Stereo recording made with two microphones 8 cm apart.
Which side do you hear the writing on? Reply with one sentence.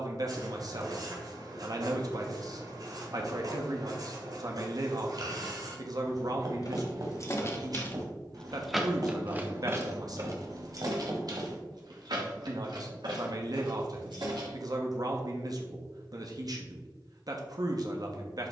You can hear the writing on the right.